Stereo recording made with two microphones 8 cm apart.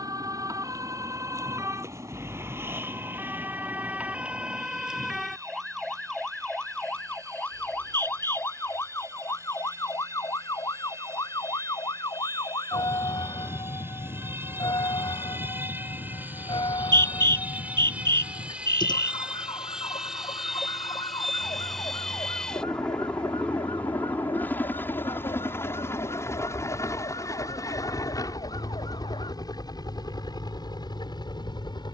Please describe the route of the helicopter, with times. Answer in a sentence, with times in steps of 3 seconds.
You can hear the helicopter on the right from 0 s, in the centre from 18 s and on the left from 24 s.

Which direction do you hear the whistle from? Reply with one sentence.
You can hear the whistle on the right.